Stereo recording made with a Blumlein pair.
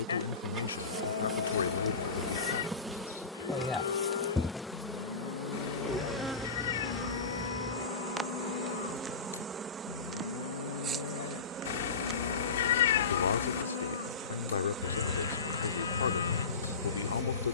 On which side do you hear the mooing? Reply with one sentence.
You can hear the mooing on the left.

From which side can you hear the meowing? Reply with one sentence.
In this clip you hear the meowing on the left.